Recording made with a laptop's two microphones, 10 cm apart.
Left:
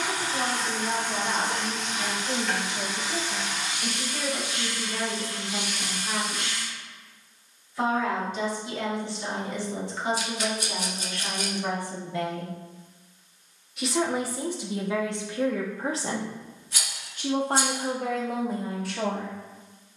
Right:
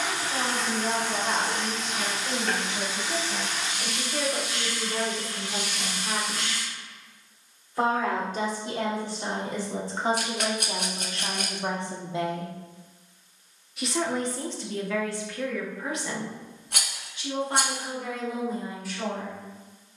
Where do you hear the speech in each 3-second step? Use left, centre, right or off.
right, right, right, right, centre, left, left.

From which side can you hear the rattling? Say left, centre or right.
right.